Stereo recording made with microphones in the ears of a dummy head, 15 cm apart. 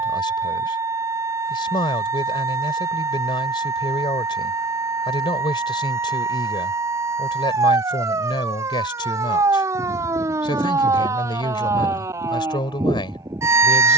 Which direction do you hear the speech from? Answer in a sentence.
In this clip you hear the speech on the left.